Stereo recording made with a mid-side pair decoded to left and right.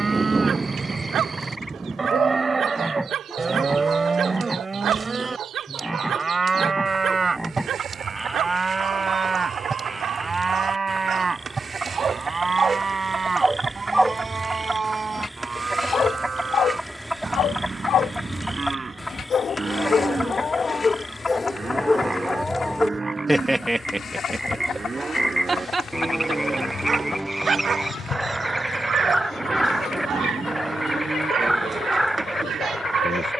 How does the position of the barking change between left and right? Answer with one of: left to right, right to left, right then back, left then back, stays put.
left then back.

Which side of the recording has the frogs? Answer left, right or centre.
centre.